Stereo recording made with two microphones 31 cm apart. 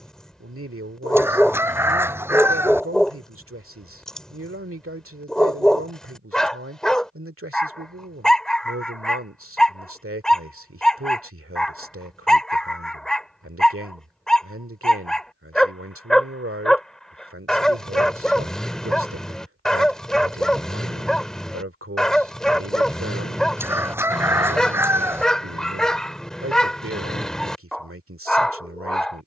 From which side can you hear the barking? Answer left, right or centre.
centre.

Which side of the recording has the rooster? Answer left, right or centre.
centre.